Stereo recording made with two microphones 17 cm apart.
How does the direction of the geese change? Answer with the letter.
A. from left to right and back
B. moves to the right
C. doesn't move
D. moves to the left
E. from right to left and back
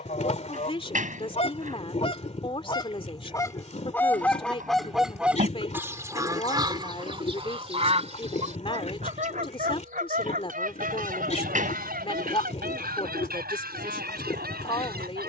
B.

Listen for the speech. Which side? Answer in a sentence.
You can hear the speech on the left.